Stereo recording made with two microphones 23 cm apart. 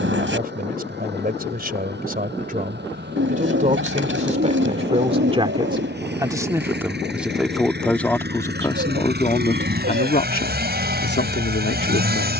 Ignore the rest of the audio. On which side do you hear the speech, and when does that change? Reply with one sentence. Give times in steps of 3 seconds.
In this clip you hear the speech on the right from 0 s, in the centre from 6 s and on the left from 9 s.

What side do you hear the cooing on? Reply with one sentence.
In this clip you hear the cooing on the right.